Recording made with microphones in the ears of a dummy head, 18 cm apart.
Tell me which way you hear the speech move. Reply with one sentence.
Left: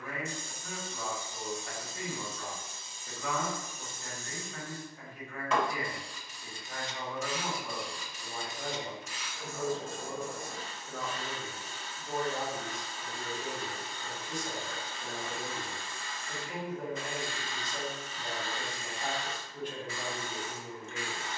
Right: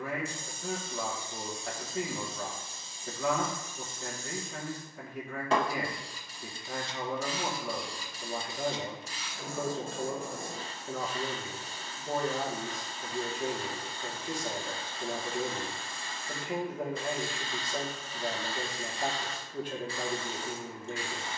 You can hear the speech stay put.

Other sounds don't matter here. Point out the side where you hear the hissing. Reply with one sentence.
You can hear the hissing on the right.